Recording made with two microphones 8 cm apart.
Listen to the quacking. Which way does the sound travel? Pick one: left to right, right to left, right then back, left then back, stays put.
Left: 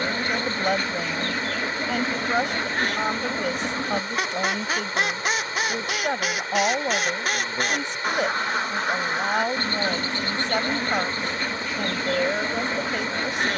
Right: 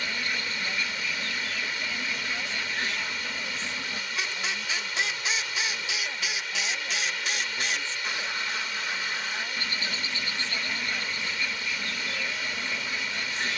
stays put.